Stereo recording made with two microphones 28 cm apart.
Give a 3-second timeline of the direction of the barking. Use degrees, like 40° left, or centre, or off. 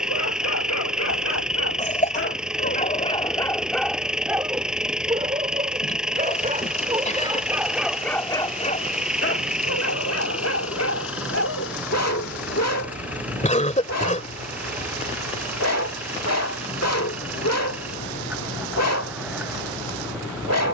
50° left, 10° right, 10° right, 60° left, 60° left, 60° left, 60° left.